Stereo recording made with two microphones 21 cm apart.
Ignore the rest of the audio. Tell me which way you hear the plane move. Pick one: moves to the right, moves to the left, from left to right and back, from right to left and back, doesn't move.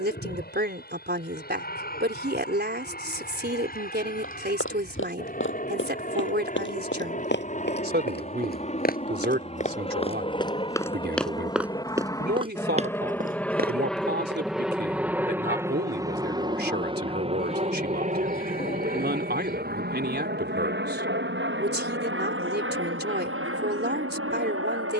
moves to the right.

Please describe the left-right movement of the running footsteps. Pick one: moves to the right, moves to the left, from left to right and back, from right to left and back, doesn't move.
moves to the right.